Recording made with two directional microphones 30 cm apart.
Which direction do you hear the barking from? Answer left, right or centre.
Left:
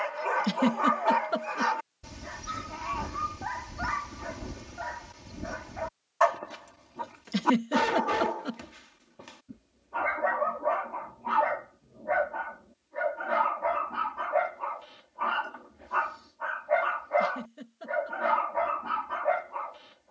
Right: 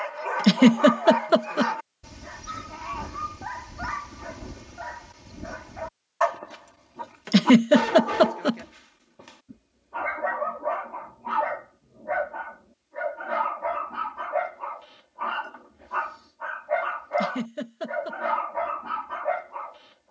centre.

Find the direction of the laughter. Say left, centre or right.
right.